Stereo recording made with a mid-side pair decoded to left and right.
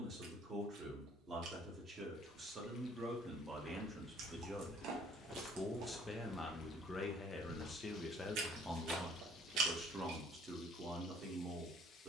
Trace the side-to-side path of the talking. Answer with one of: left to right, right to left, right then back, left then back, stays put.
left then back.